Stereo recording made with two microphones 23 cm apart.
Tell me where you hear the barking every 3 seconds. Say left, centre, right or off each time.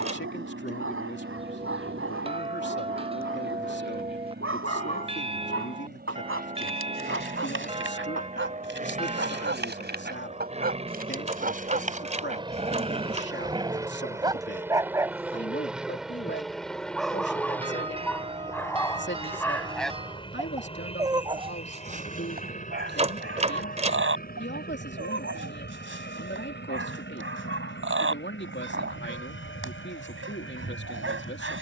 right, right, right, right, right, centre, centre, right, right, right, right.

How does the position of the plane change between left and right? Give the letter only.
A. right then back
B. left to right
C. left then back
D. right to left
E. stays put
D.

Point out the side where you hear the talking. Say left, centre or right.
left.